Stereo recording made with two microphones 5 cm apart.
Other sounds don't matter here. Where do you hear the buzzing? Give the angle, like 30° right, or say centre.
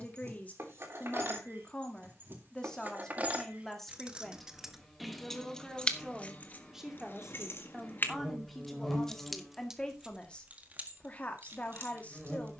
10° left.